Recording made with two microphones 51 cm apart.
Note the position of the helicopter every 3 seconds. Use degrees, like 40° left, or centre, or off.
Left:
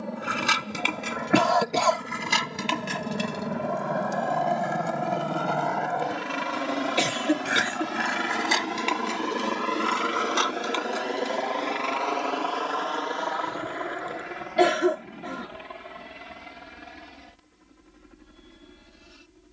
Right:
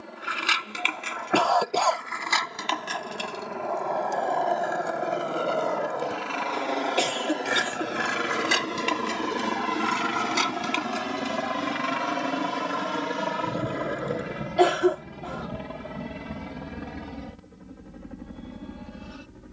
60° left, 50° left, 20° left, 20° right, 50° right, 60° right, 70° right.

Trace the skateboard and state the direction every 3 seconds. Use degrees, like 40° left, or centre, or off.
60° left, 20° left, 20° right, 40° right, 60° right, off, off.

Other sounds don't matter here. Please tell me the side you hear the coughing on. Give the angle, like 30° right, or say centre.
40° left.